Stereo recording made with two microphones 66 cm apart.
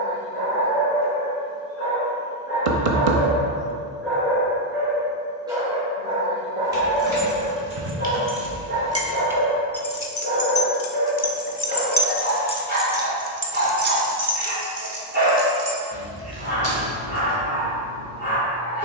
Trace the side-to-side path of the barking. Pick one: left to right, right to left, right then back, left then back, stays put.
left to right.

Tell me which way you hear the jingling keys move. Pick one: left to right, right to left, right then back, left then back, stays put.
left then back.